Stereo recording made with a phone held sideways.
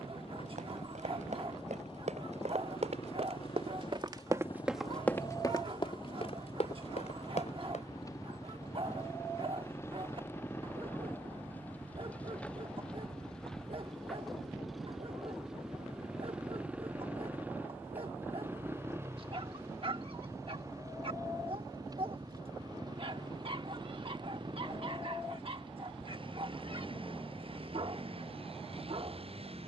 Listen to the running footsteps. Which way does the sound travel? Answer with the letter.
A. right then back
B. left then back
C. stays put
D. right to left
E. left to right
D.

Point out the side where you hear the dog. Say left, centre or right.
right.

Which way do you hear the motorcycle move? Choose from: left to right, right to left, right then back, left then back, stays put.
left to right.